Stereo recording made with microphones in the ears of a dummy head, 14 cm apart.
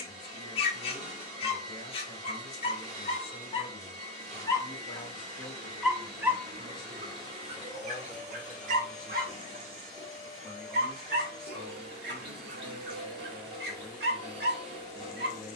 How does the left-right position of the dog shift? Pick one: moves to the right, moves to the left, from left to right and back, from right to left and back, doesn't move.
moves to the right.